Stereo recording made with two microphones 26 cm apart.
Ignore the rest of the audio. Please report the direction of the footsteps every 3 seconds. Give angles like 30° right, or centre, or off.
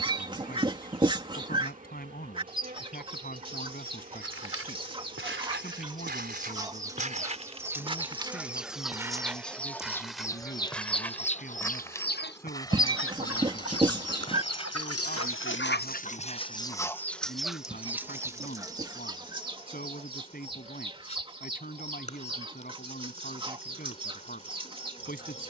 off, 50° right, 30° right, centre, 20° left, 20° left, off, off, off.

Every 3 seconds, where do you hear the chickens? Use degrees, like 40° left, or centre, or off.
20° right, 20° right, 10° right, 20° left, 60° left, 20° left, 20° right, 20° right, 20° right.